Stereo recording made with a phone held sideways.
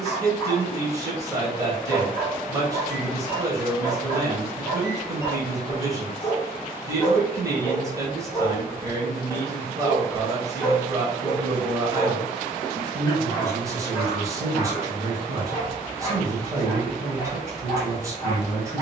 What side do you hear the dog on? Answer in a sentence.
You can hear the dog on the left.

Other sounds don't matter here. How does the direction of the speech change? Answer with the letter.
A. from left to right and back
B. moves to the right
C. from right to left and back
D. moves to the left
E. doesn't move
E.